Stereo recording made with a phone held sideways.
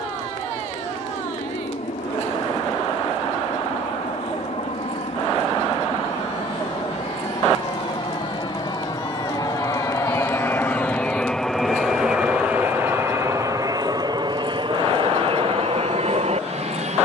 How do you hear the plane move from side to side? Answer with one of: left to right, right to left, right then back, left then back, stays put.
left to right.